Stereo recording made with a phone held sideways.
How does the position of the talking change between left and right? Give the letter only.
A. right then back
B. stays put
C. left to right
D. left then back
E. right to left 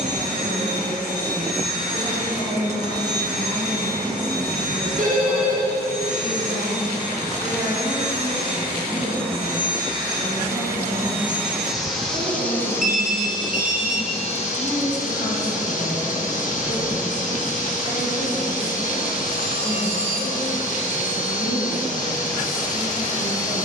A.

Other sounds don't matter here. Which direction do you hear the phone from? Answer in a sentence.
In this clip you hear the phone on the right.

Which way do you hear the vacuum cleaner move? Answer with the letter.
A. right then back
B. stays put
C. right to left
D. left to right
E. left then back
C.